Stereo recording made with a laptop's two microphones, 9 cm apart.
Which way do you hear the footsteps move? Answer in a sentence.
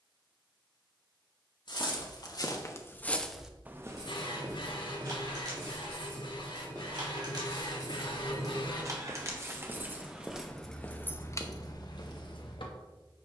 In this clip you hear the footsteps move from left to right and back again.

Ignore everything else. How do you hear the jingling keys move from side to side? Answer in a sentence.
You can hear the jingling keys move from right to left.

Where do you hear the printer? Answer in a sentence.
You can hear the printer on the left.